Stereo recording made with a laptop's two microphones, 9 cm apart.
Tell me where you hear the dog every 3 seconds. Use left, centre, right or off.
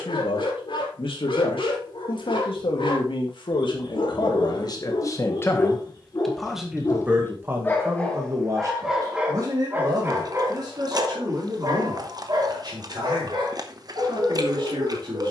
left, left, left, right, right.